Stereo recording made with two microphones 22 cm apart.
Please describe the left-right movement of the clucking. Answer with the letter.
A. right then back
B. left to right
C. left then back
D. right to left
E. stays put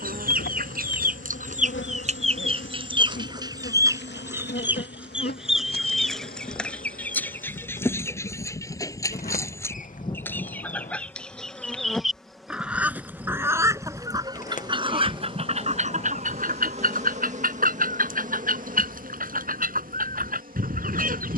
C.